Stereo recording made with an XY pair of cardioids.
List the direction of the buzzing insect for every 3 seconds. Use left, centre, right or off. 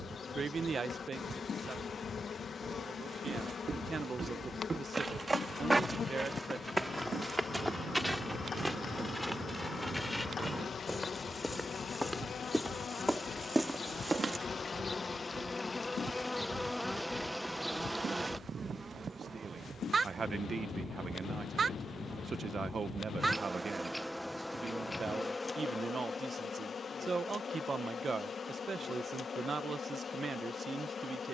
left, left, left, left, left, centre, right, right, left, left, left.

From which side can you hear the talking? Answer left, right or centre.
right.